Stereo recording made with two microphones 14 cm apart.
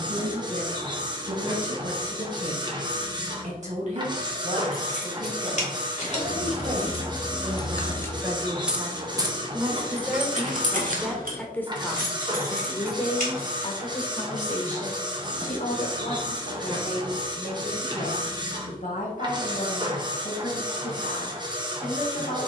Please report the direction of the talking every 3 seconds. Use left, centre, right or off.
right, right, right, centre, left, left, left, left.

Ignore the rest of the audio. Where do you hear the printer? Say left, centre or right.
right.